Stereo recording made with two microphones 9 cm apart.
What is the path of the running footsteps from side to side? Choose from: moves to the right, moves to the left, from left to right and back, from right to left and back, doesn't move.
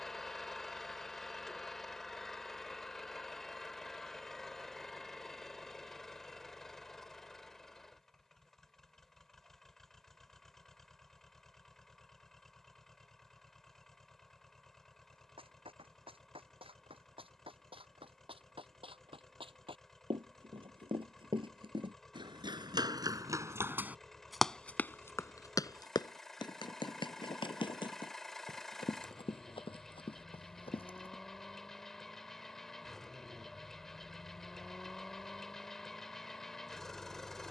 moves to the left.